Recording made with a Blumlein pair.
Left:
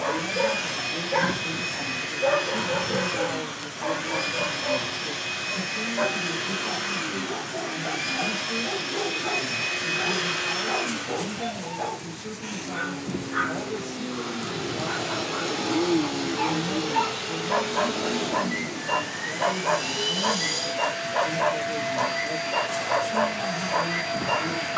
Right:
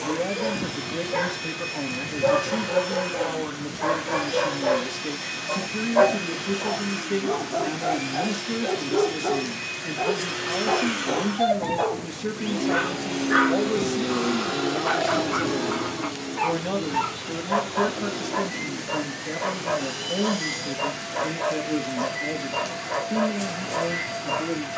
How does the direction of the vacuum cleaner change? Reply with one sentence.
In this clip you hear the vacuum cleaner go right and come back.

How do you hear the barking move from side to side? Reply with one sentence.
You can hear the barking go right and come back.